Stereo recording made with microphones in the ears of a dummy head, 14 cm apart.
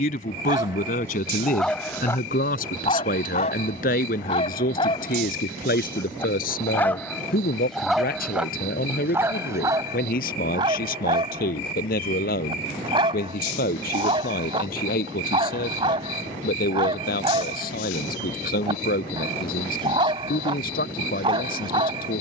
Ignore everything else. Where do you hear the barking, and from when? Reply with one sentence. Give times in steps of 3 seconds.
You can hear the barking in the centre from 0 s, on the left from 3 s, in the centre from 6 s and on the right from 9 s.